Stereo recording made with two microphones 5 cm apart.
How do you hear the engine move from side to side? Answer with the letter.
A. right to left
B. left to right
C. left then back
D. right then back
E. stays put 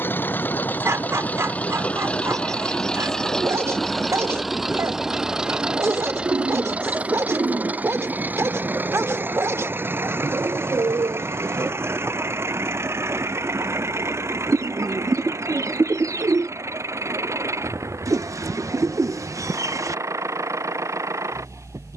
B.